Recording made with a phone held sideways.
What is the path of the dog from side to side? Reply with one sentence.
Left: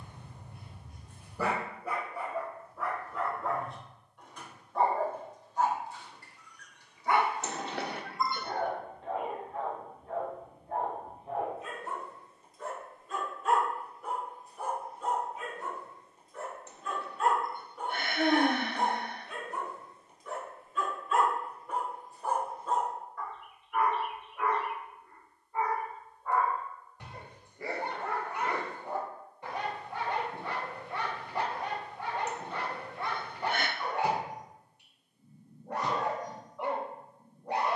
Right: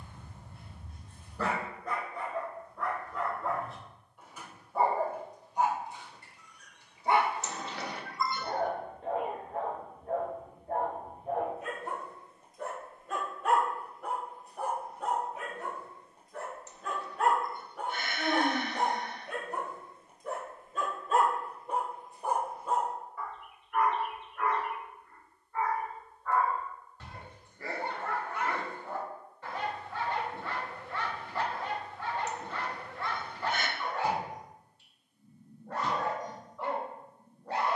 In this clip you hear the dog move from left to right and back again.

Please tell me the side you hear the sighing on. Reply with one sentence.
In this clip you hear the sighing on the left.